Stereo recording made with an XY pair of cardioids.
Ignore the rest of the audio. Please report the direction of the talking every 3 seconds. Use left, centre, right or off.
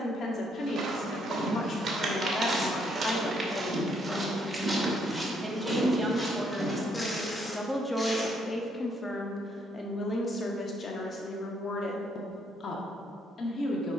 left, centre, centre, left, left.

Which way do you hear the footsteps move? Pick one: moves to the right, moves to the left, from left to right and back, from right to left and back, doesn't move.
moves to the left.